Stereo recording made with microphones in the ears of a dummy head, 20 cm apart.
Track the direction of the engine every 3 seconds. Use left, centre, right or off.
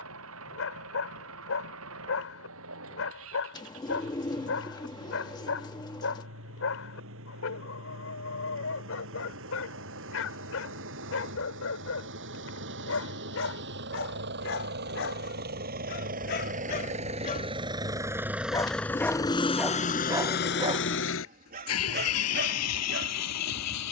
right, right, right, right, right, right, left, left.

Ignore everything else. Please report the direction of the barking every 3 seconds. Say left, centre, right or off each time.
left, left, left, left, left, left, centre, right.